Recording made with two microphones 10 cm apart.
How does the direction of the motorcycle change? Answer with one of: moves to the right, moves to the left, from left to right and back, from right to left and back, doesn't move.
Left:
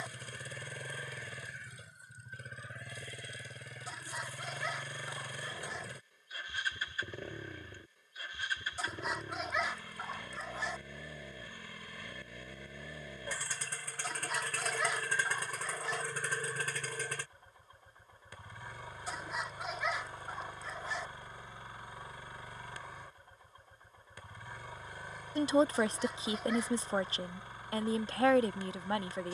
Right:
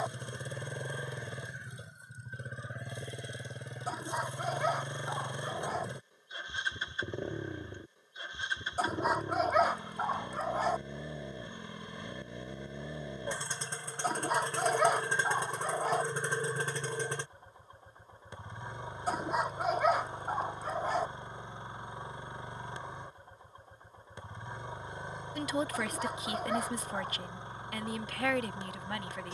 doesn't move.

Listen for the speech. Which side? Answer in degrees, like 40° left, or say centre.
30° left.